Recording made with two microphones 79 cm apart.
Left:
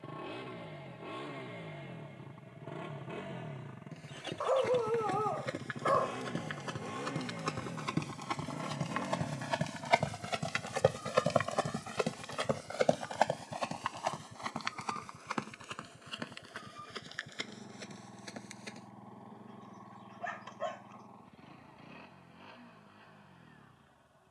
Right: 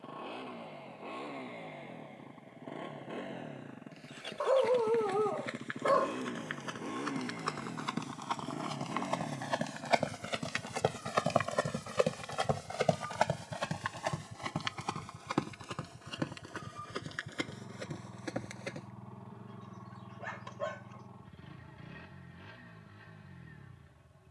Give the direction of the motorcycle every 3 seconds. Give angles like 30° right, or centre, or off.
50° left, 30° left, 20° left, centre, 20° right, 30° right, 40° right, 50° right.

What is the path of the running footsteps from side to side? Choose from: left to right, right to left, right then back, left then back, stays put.
left to right.